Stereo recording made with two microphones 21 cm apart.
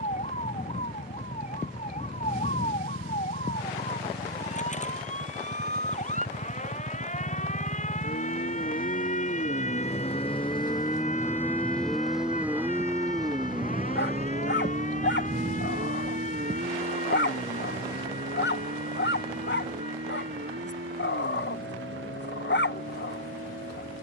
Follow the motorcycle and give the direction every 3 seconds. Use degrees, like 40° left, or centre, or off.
80° left, 70° left, 50° left, 20° left, 20° right, 50° right, 60° right, 70° right.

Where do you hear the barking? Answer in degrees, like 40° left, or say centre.
60° left.